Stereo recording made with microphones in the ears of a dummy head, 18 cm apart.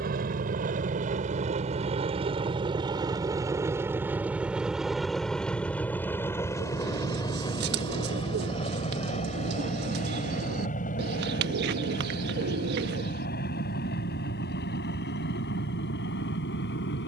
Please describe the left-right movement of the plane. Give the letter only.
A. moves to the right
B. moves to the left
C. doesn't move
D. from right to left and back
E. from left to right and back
B.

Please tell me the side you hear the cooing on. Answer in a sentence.
You can hear the cooing on the right.